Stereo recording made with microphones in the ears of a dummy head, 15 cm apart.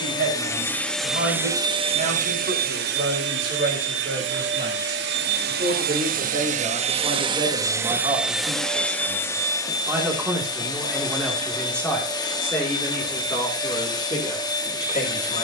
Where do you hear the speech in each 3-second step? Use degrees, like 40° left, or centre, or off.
60° right, 50° right, 30° right, centre, 20° left.